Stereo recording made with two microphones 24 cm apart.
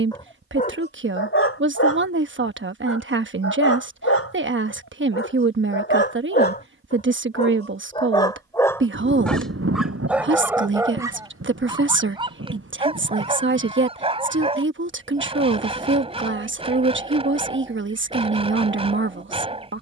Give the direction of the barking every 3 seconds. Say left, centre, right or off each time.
left, left, left, centre, right, right, right.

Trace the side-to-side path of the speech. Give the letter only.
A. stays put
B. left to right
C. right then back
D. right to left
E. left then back
A.